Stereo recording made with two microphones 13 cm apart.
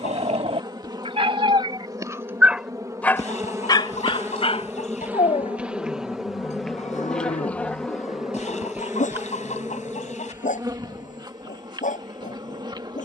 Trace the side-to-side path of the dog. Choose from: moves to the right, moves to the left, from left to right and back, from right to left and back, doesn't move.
moves to the left.